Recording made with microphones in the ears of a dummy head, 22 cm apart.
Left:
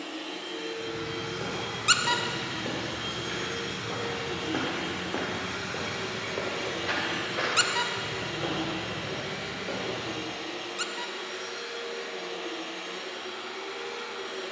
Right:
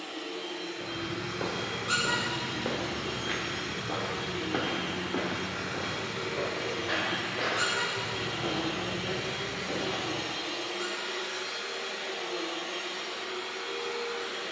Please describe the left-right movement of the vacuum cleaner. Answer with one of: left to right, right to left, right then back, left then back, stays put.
left to right.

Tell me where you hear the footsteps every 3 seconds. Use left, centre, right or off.
right, centre, left, left, off.